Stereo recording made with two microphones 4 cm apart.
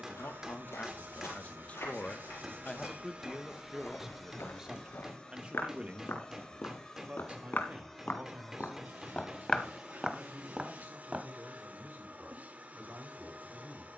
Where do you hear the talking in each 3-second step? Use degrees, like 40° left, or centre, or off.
40° left, 10° right, 40° right, 50° right, 50° right.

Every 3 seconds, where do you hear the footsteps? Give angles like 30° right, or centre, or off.
80° left, 70° left, 50° left, centre, off.